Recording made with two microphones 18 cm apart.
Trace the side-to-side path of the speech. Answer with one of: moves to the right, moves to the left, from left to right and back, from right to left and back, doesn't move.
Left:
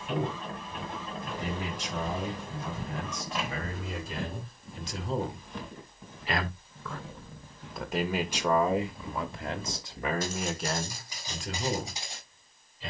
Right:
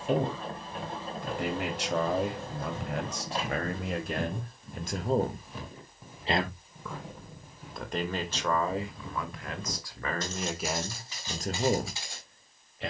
from right to left and back.